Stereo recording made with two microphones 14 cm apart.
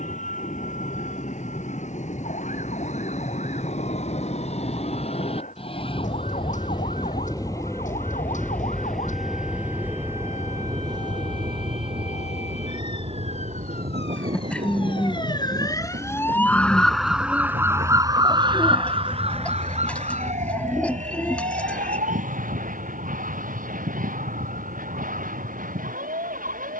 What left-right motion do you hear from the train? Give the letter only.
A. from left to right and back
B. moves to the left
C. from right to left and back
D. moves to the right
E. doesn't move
D.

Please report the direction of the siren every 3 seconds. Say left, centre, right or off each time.
left, left, left, left, left, centre, right, right, right.